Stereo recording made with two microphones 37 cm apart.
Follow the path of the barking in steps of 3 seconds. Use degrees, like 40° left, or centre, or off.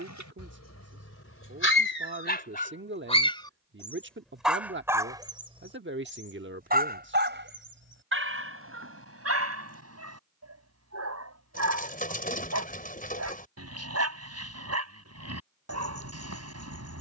40° left, centre, 30° right, 50° right, 50° right, 50° right.